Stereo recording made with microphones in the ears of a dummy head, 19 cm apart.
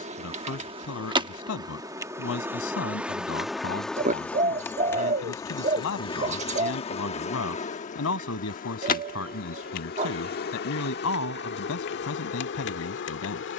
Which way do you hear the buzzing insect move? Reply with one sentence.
You can hear the buzzing insect go from the right side to the left.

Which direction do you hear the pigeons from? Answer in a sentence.
In this clip you hear the pigeons on the right.